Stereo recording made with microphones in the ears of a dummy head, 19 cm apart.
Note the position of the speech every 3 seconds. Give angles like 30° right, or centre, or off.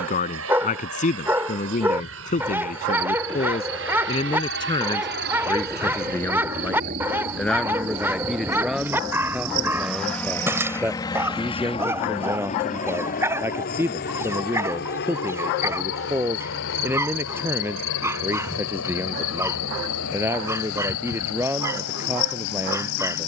40° left, 20° left, centre, 10° right, 10° right, 10° right, 10° right, 10° right.